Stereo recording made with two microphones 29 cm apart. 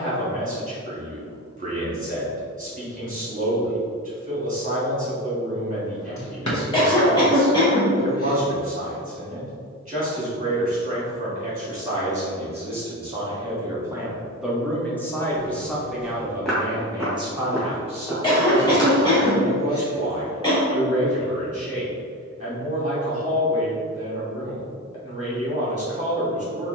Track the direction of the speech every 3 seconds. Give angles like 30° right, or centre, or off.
30° right, 30° right, 30° right, 30° right, 10° right, 10° right, 20° right, 20° right, 20° right.